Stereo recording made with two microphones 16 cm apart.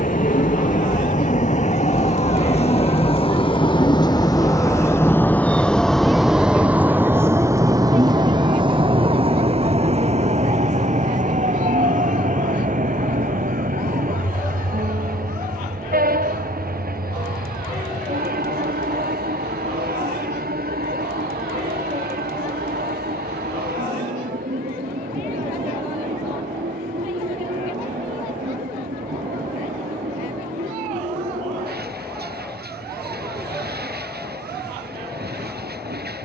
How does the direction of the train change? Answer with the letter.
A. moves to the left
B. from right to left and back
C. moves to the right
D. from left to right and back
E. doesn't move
C.